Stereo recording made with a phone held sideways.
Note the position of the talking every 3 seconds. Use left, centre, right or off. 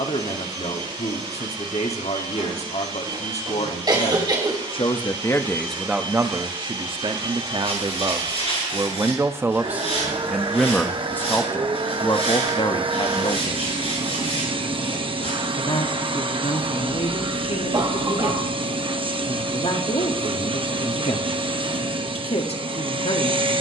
left, left, right, centre, left, left, left, left.